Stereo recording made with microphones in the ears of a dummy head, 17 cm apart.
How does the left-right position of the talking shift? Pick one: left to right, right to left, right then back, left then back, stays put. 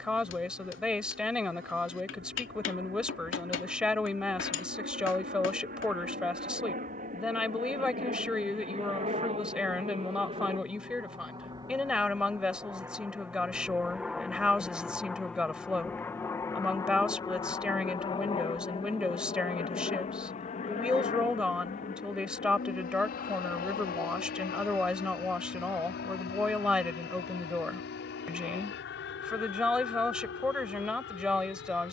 stays put.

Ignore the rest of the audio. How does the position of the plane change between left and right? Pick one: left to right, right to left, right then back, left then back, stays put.
right to left.